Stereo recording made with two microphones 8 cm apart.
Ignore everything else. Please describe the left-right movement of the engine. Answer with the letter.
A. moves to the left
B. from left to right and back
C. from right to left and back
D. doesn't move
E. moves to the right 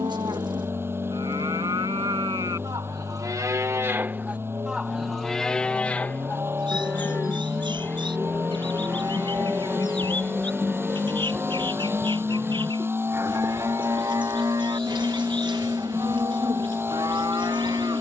D.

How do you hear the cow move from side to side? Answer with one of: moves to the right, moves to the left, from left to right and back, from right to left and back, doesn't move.
from right to left and back.